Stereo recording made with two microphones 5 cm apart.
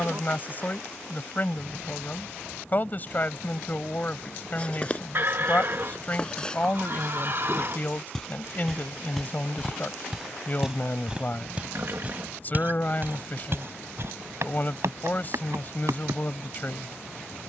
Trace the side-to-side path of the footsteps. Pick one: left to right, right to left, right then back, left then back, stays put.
left to right.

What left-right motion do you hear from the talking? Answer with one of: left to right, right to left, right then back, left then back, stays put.
stays put.